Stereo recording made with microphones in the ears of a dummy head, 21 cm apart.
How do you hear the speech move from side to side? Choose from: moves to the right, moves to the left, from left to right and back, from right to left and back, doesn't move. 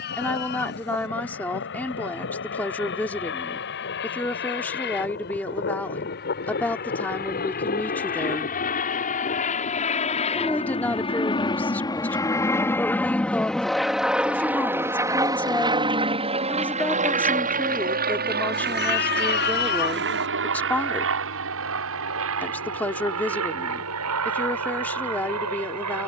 doesn't move.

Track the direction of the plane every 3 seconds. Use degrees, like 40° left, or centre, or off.
60° left, 50° left, 40° left, 30° left, centre, 30° right, 50° right, 60° right, 70° right.